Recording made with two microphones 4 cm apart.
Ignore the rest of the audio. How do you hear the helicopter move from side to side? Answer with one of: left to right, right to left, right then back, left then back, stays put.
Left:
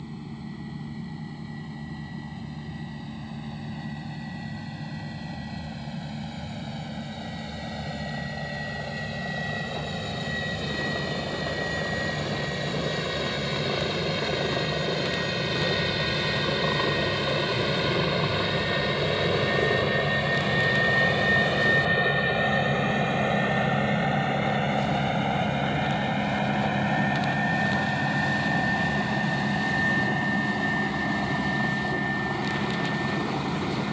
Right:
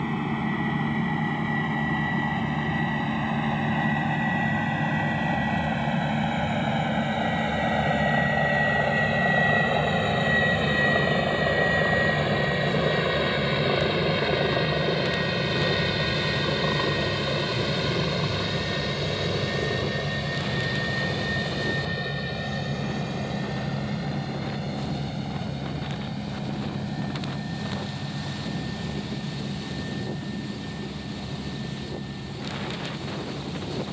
right to left.